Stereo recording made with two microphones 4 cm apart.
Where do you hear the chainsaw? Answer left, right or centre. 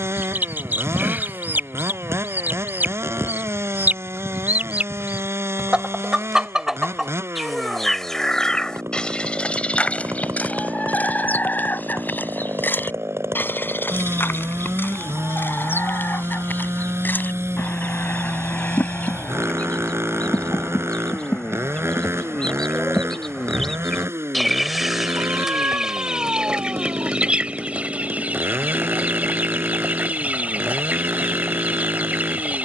right.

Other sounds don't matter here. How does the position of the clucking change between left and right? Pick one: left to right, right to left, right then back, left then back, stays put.
left then back.